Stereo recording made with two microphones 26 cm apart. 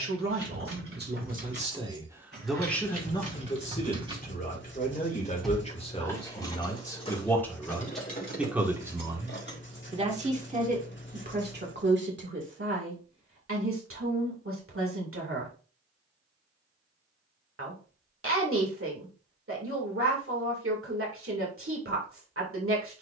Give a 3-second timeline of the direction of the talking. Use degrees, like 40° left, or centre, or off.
30° right, 30° left, 10° left, 30° right, 50° right, 50° right, 50° right, 50° right.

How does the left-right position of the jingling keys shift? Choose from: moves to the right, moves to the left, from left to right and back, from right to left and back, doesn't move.
moves to the left.